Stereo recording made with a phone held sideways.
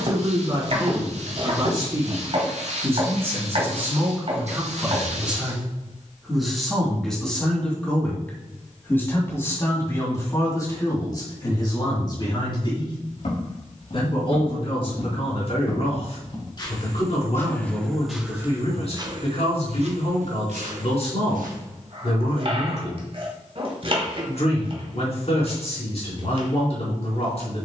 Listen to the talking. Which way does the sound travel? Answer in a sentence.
In this clip you hear the talking go from the right side to the left.